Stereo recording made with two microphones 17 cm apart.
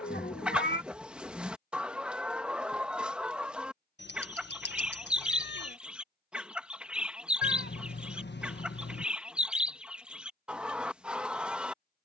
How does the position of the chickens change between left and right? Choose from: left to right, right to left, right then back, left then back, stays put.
stays put.